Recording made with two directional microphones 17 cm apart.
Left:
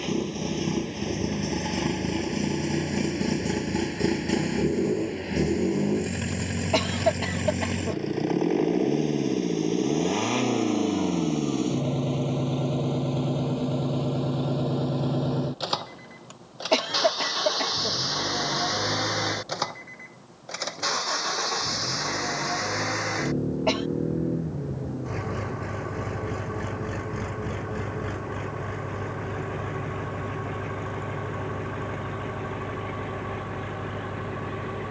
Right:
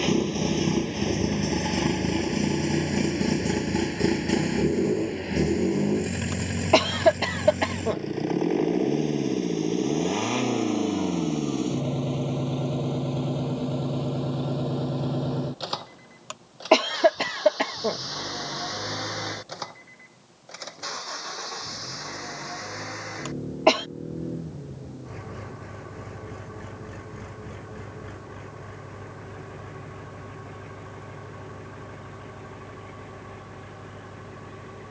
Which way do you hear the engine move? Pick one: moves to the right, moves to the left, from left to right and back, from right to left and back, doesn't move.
moves to the left.